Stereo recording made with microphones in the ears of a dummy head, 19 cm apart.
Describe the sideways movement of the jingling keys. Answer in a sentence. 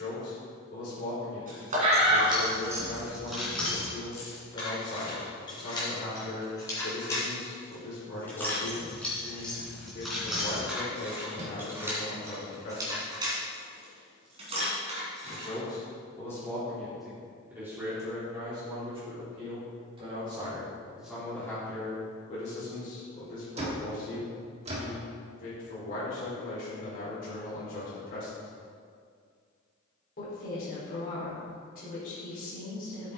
You can hear the jingling keys move from right to left and back again.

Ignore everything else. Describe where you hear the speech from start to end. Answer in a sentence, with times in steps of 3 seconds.
In this clip you hear the speech on the left from 0 s, in the centre from 15 s, on the right from 18 s and on the left from 21 s.